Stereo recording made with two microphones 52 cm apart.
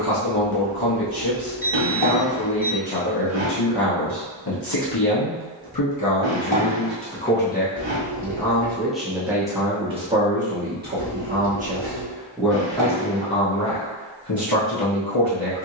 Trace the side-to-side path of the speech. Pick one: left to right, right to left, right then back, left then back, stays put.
right then back.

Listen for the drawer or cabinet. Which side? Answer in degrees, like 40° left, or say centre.
60° right.